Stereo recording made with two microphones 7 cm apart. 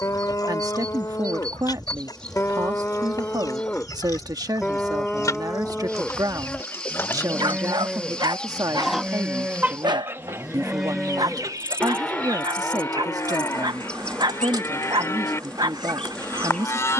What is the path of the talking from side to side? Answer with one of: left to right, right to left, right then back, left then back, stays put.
stays put.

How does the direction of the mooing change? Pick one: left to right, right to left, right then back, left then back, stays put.
right then back.